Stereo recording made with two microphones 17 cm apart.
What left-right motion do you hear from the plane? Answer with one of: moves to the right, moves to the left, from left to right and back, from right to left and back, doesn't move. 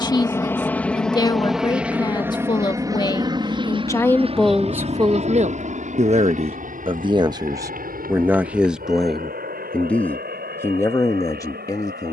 moves to the right.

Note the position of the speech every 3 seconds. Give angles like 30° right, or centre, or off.
30° left, centre, 20° right, 10° left.